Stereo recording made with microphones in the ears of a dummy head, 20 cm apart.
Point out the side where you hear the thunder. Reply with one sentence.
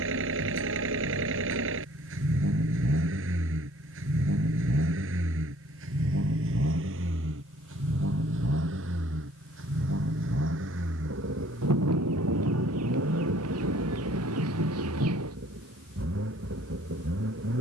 You can hear the thunder on the right.